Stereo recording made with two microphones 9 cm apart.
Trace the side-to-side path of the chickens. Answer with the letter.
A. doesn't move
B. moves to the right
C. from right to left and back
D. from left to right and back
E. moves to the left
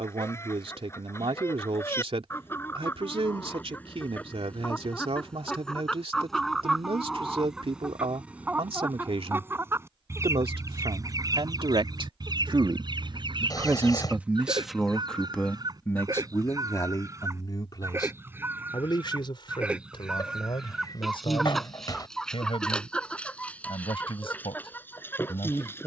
D.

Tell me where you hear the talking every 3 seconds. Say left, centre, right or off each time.
right, right, right, right, right, left, left, left, left.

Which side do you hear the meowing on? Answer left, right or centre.
left.